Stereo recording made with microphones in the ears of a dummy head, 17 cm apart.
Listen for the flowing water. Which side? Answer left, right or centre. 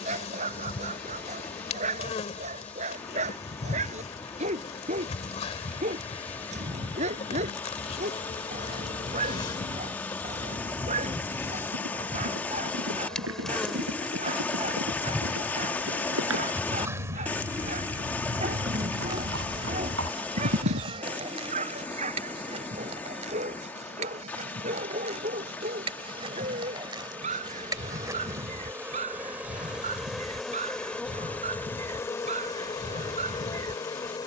centre.